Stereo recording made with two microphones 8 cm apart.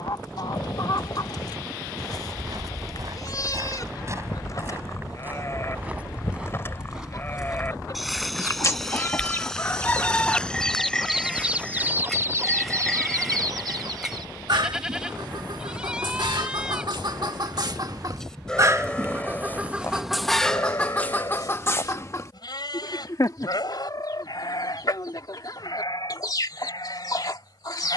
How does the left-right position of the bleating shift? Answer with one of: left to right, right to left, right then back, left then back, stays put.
right then back.